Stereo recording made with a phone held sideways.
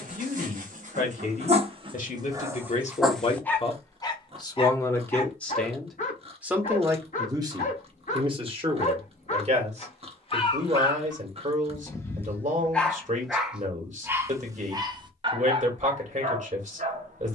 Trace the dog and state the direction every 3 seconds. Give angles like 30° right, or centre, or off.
40° right, 20° left, 50° left, 30° left, 10° right, 40° right.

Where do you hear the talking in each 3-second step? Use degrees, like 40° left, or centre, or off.
50° left, 20° left, 20° right, 40° right, 50° right, 50° right.